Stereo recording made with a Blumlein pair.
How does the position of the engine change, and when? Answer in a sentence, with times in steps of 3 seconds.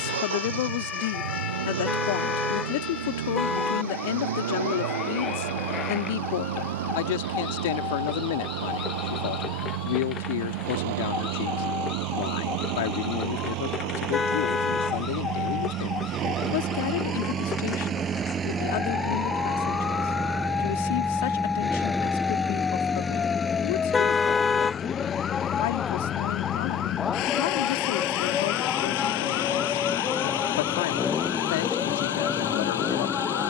You can hear the engine on the right from 0 s, in the centre from 18 s and on the left from 24 s.